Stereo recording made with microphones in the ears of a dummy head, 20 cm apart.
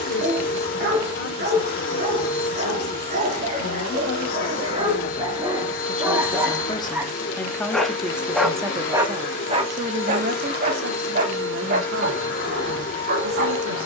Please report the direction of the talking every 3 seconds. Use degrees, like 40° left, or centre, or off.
50° left, 40° left, 10° left, 50° right, 70° right.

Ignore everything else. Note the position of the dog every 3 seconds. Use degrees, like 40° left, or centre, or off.
40° right, 30° right, 10° right, 40° right, 40° right.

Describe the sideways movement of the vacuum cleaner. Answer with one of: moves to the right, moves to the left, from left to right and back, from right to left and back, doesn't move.
doesn't move.